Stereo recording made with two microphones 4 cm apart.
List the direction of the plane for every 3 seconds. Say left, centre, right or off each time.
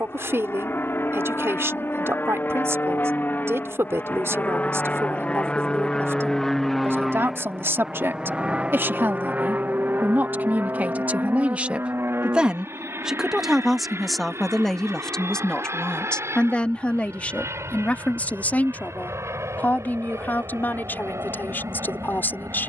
left, left, centre, right, right, right, right, right.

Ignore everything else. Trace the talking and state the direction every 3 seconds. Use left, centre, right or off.
right, right, right, right, centre, left, left, left.